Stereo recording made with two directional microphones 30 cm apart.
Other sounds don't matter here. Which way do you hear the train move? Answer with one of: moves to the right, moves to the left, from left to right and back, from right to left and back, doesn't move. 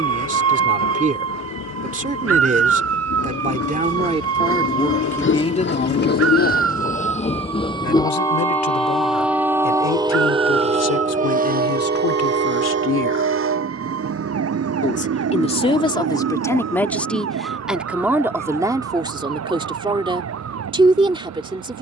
moves to the right.